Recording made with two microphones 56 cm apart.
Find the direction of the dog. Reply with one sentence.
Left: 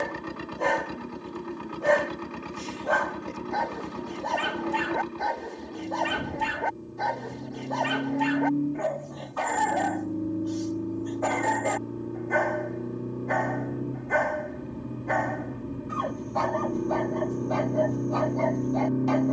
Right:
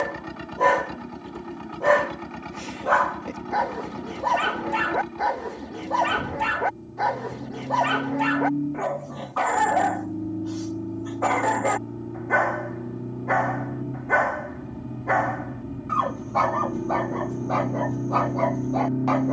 In this clip you hear the dog on the right.